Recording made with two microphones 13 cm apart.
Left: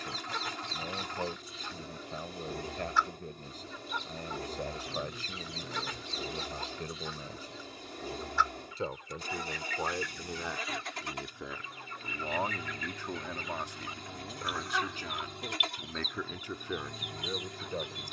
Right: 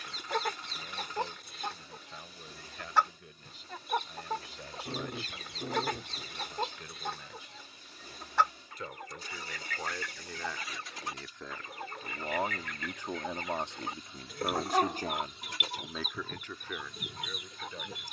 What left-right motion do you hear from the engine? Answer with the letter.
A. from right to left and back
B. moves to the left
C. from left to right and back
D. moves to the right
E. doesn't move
E.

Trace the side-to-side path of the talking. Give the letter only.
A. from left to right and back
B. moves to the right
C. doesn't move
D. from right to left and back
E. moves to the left
A.